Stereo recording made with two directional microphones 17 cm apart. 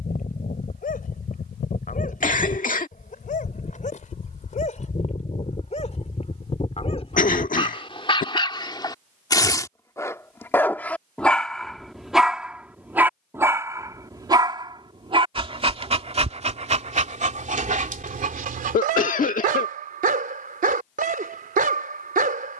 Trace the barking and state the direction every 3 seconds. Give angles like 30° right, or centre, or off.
50° left, 50° left, 30° left, 10° left, 20° right, 40° right, 50° right, 50° right.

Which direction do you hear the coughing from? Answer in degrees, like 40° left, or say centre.
50° left.